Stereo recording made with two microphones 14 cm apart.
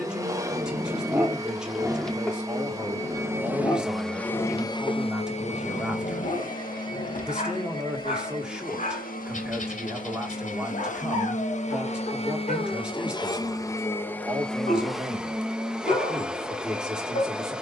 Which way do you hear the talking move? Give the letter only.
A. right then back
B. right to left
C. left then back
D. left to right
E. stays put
E.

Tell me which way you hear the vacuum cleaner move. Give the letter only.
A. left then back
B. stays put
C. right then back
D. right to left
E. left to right
A.